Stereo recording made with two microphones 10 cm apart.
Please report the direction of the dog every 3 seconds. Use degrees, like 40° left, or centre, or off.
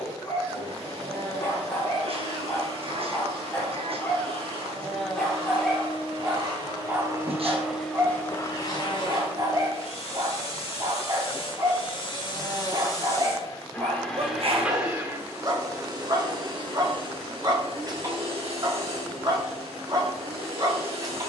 20° left, 10° left, 20° right, 40° right, 40° right, 40° right, 40° right.